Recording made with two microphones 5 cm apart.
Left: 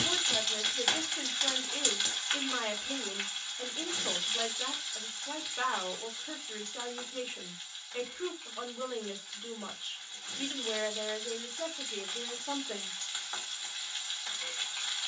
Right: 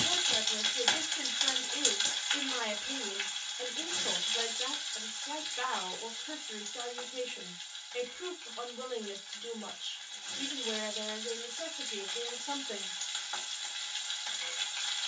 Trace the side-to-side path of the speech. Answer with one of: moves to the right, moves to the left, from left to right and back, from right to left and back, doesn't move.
doesn't move.